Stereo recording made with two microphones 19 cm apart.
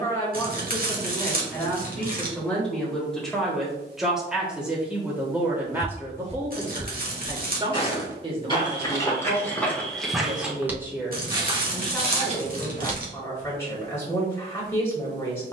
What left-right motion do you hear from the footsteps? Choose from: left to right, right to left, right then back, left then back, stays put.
left then back.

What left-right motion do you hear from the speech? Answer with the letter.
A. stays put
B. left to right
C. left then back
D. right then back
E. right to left
D.